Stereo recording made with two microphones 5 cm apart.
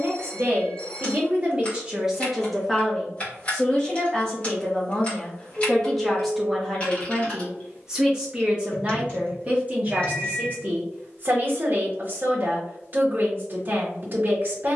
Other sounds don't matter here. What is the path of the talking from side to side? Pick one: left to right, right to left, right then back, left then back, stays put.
left then back.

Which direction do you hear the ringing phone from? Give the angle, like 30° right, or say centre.
20° left.